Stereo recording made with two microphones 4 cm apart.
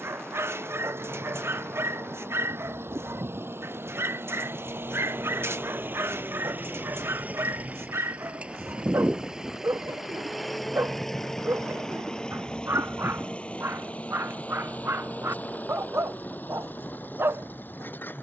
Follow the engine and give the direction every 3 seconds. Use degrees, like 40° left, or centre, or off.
70° right, 60° right, 30° right, centre, 30° left, 50° left.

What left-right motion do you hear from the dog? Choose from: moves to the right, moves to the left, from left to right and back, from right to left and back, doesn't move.
doesn't move.